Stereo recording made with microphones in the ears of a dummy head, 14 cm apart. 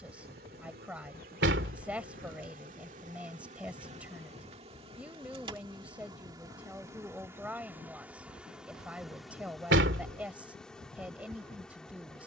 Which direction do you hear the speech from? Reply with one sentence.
You can hear the speech in the centre.